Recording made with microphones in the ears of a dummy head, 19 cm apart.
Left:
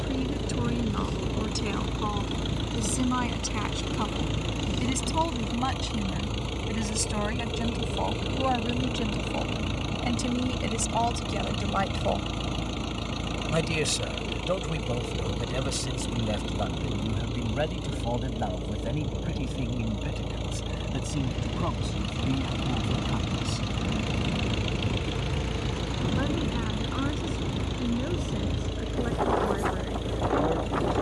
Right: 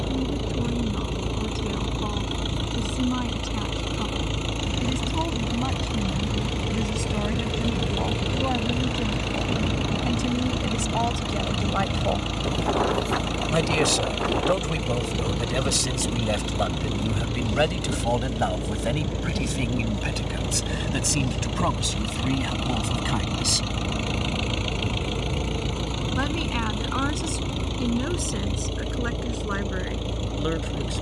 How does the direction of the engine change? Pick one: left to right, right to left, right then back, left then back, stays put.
stays put.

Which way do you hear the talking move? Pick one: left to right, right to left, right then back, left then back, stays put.
left to right.